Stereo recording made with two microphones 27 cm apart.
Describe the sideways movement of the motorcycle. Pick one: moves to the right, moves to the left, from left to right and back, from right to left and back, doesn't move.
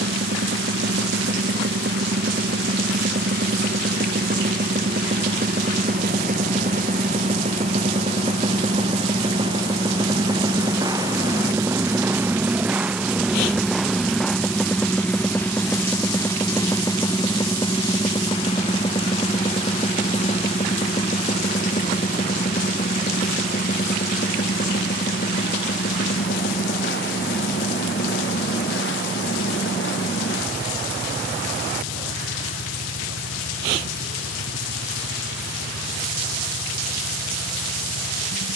moves to the left.